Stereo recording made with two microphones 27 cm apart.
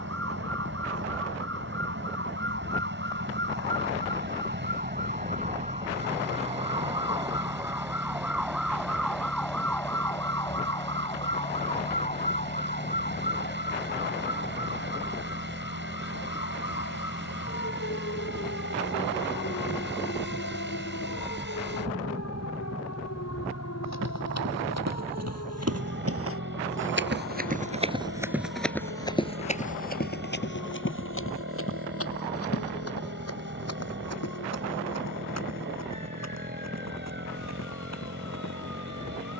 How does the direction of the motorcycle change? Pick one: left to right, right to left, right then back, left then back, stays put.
stays put.